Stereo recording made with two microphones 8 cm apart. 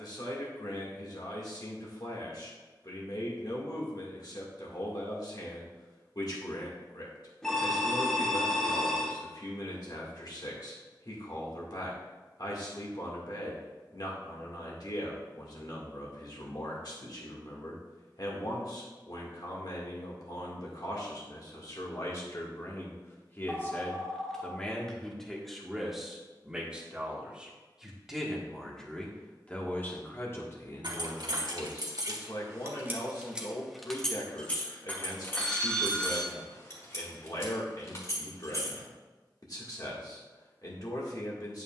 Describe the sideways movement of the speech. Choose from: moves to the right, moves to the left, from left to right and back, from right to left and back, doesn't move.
from left to right and back.